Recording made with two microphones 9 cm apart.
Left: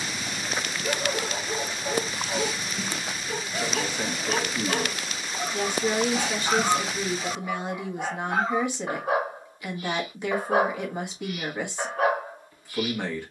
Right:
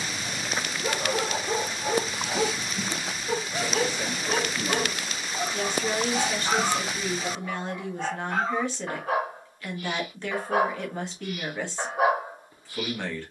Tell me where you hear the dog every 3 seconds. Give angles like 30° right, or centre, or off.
40° right, 20° right, 10° left, 10° left, 20° right.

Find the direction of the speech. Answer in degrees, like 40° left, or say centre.
10° left.